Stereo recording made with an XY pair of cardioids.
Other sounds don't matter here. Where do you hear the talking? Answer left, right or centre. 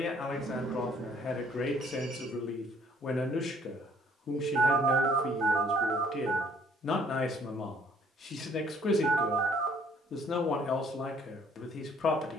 left.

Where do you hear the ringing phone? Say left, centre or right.
right.